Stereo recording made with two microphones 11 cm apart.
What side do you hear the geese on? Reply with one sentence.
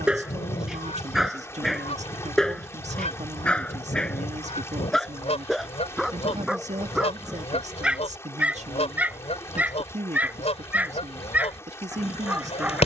In this clip you hear the geese on the left.